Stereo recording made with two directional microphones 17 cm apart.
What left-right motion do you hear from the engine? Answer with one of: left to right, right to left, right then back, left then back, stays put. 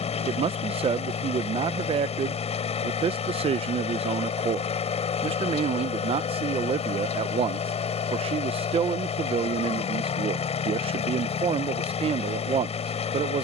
stays put.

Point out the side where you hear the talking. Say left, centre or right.
right.